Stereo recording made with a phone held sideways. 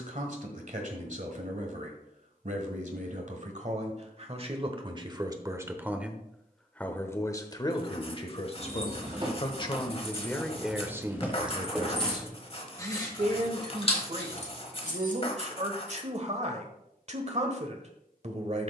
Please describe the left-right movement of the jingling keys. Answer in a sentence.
You can hear the jingling keys go from the right side to the left.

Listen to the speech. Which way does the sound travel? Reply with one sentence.
In this clip you hear the speech move from right to left and back again.